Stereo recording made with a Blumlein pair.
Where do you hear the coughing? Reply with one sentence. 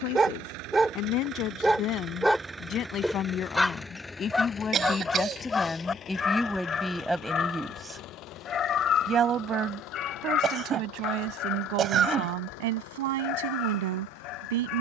In this clip you hear the coughing on the right.